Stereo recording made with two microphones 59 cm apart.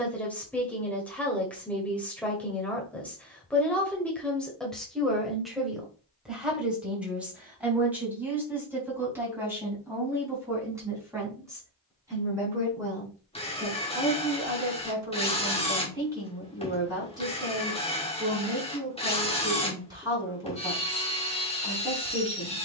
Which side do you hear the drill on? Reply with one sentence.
In this clip you hear the drill in the centre.